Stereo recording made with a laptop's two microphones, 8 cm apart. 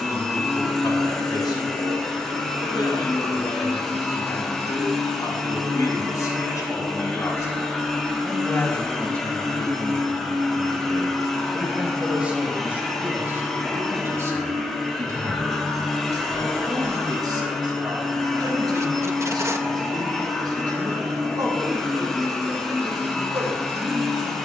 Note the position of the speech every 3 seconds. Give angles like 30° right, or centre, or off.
60° left, 60° left, 40° left, 10° left, 30° right, 50° right, 60° right, 60° right.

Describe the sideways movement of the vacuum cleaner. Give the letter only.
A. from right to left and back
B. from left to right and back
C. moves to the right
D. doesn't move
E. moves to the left
D.